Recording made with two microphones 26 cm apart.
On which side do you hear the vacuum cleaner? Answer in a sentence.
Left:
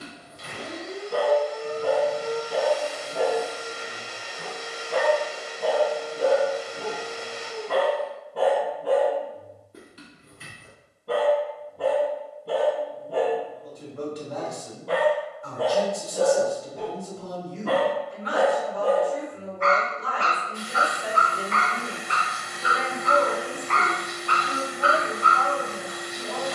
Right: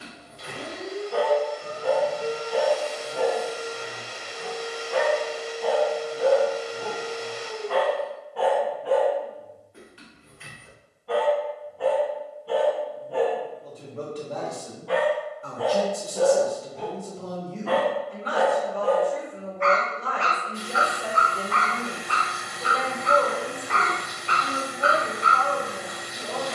In this clip you hear the vacuum cleaner on the right.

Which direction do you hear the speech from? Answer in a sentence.
In this clip you hear the speech on the right.